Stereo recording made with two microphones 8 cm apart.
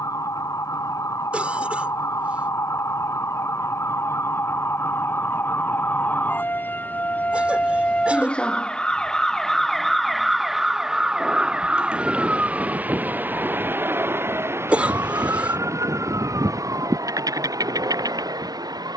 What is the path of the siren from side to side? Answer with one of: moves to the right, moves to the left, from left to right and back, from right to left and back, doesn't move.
moves to the right.